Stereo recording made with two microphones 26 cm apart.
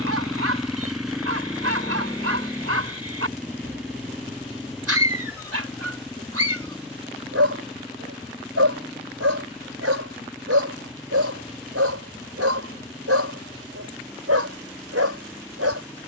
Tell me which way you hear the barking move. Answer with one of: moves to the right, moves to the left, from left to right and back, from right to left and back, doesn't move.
doesn't move.